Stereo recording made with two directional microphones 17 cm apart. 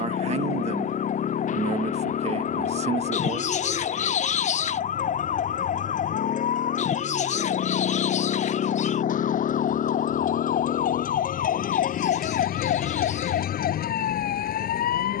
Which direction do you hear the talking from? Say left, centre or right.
right.